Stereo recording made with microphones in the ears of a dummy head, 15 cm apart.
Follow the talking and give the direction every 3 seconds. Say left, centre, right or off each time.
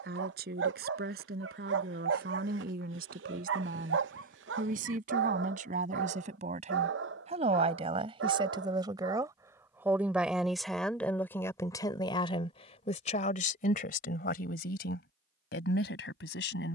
right, right, right, centre, left, left.